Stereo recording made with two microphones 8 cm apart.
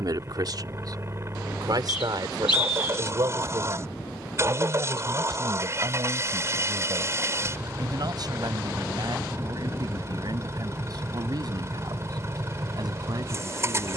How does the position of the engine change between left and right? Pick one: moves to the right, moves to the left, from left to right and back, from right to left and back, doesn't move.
doesn't move.